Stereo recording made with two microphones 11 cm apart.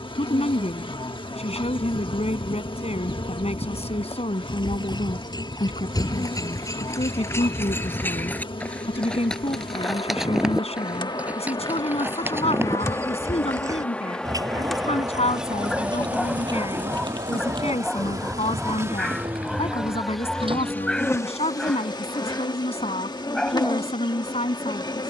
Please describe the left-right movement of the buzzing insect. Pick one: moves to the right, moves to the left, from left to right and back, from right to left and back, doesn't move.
from left to right and back.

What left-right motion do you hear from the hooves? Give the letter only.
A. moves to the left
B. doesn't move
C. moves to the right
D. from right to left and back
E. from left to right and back
C.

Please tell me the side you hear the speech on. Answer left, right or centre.
left.